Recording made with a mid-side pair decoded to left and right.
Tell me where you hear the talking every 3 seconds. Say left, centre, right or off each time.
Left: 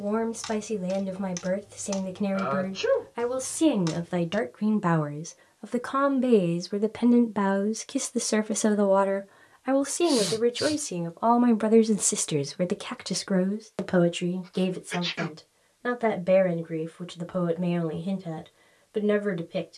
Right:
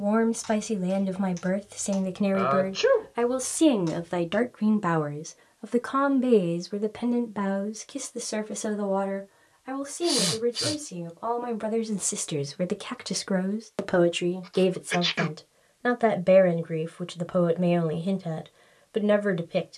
right, centre, left, left, centre, right, right.